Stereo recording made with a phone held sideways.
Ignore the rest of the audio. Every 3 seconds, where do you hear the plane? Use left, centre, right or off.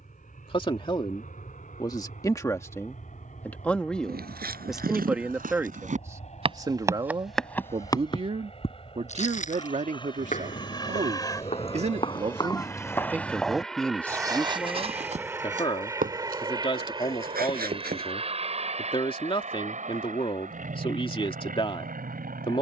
left, left, left, left, centre, right, right, right.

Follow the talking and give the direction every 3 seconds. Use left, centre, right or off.
left, centre, right, right, centre, left, left, left.